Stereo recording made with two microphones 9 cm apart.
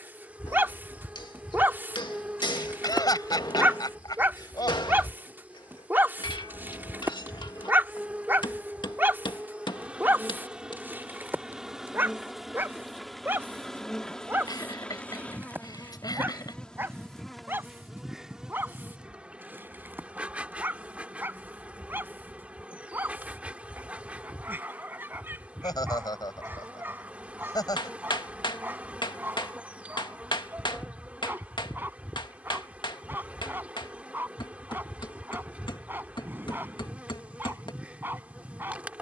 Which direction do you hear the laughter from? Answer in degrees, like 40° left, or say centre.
50° left.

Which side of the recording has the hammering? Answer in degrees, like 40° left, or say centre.
60° left.